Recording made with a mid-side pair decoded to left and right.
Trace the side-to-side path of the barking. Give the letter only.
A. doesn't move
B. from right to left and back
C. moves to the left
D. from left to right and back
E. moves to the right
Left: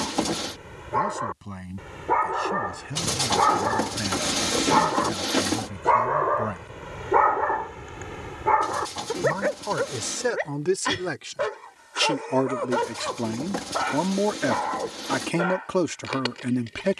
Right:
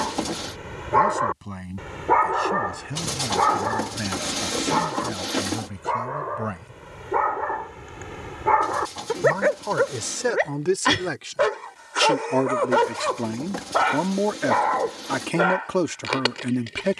B.